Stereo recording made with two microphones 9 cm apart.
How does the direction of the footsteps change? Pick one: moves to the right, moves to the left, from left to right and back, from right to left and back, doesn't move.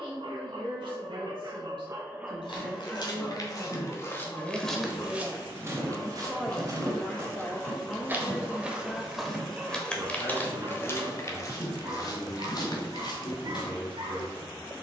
from left to right and back.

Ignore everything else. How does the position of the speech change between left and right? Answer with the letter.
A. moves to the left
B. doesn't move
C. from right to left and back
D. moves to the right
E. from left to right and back
A.